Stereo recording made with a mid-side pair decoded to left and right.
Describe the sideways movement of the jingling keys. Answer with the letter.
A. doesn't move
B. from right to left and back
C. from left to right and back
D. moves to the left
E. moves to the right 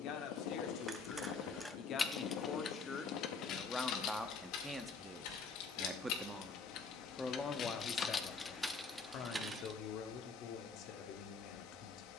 B.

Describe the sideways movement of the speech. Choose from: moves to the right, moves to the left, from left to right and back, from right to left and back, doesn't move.
from left to right and back.